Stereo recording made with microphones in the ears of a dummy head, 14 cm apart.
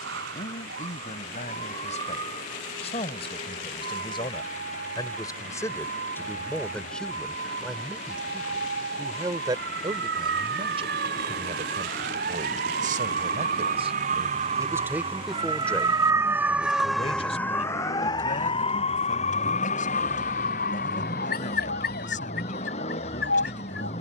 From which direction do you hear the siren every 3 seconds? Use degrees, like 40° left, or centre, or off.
80° right, 80° right, 70° right, 70° right, 50° right, 10° right, 40° left, 60° left.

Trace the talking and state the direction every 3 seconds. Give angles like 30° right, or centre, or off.
40° left, 30° left, centre, 30° right, 40° right, 20° left, 50° left, 50° left.